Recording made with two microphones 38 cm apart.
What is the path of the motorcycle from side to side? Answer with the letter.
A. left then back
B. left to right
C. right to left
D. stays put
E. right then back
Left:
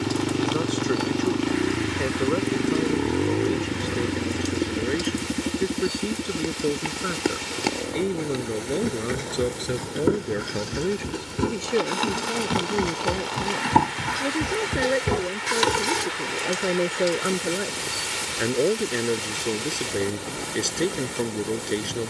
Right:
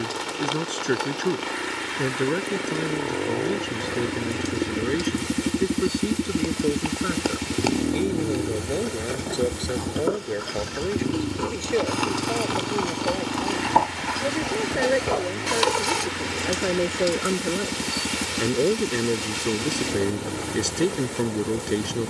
B.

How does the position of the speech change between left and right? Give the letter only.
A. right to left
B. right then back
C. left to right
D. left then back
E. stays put
D.